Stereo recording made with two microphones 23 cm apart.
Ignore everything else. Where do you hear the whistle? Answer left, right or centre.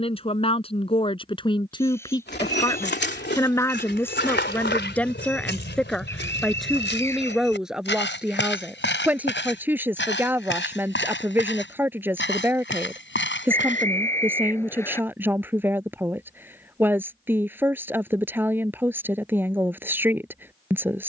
centre.